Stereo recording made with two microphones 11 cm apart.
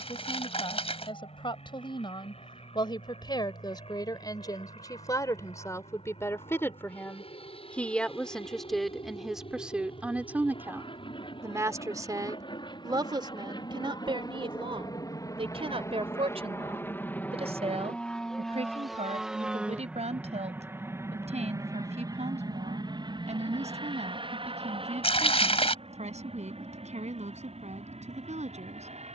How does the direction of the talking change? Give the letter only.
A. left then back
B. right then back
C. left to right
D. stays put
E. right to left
C.